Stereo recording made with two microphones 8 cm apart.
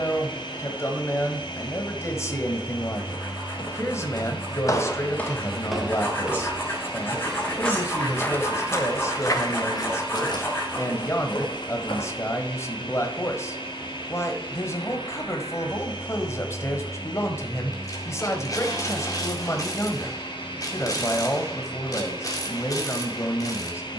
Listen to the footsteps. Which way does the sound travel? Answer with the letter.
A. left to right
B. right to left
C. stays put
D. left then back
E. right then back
E.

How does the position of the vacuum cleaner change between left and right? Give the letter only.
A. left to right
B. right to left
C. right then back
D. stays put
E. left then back
D.